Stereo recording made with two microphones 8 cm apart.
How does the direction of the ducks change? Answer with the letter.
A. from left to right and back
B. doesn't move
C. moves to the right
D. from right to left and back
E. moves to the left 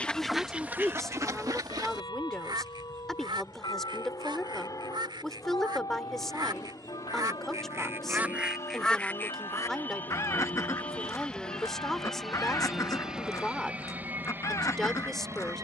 A.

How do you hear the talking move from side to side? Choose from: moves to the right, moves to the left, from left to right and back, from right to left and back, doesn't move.
doesn't move.